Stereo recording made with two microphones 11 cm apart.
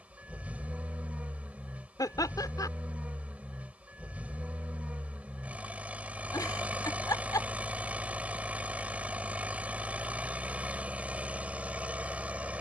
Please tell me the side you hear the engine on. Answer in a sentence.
You can hear the engine in the centre.